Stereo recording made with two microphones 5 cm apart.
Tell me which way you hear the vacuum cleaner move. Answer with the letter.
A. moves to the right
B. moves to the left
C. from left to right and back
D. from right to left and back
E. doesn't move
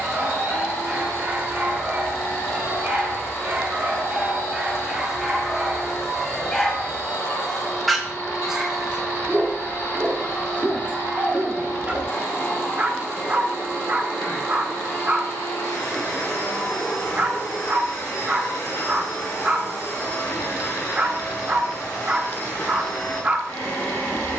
E.